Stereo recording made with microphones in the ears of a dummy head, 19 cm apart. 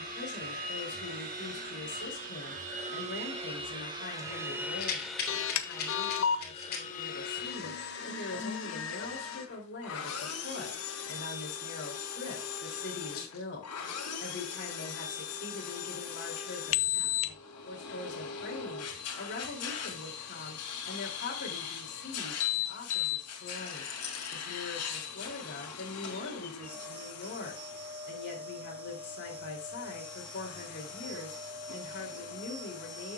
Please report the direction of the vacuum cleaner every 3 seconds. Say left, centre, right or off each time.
right, centre, left, left, left, left, left, left, left, left, left.